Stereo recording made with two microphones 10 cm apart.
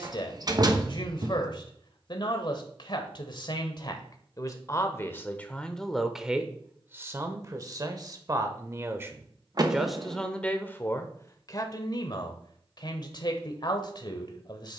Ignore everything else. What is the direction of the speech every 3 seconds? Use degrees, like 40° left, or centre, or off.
50° left, 30° left, 30° right, 10° left, 50° left.